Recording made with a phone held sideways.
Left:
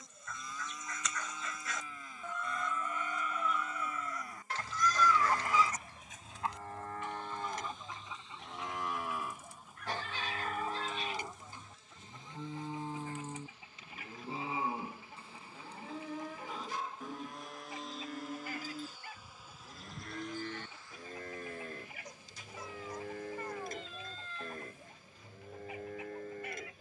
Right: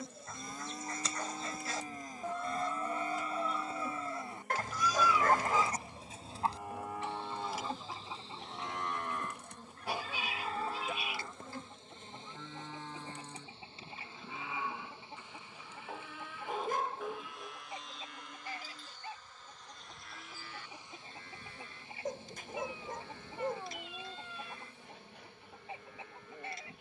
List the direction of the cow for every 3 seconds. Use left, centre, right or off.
right, right, centre, centre, left, left, left, left, left.